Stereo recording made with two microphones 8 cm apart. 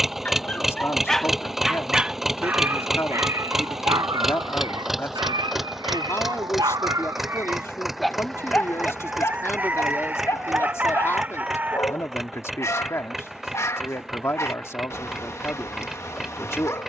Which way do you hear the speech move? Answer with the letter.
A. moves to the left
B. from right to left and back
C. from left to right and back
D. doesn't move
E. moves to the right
D.